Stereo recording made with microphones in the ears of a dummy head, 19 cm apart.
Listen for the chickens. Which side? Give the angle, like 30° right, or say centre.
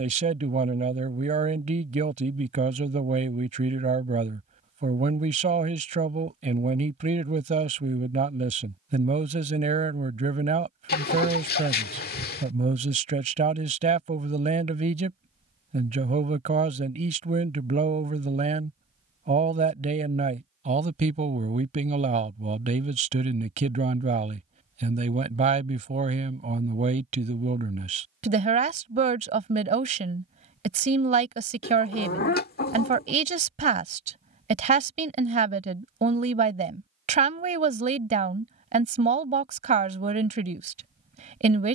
50° left.